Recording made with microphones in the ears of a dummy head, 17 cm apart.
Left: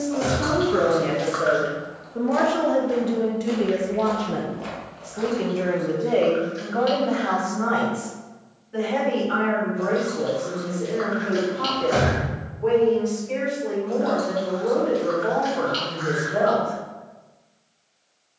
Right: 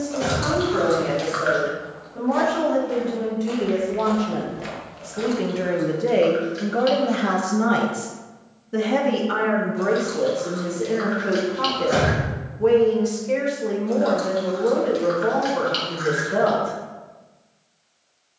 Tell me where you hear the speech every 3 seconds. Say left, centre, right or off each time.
left, centre, right, right, right, right.